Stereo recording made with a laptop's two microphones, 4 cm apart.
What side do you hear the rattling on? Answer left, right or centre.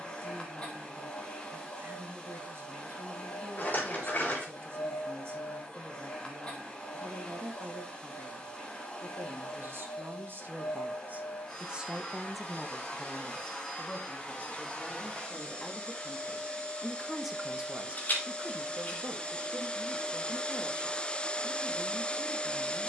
left.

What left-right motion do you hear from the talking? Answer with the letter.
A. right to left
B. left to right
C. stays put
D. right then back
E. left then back
E.